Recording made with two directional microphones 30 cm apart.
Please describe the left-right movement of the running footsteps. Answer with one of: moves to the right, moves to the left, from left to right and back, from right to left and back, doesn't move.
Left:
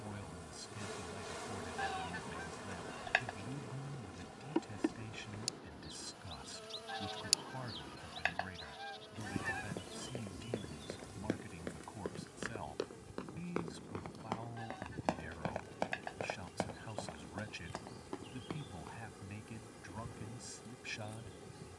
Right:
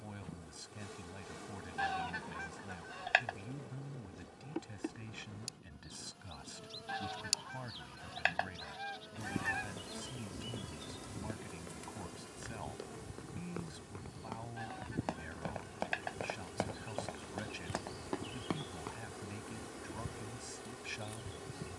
moves to the right.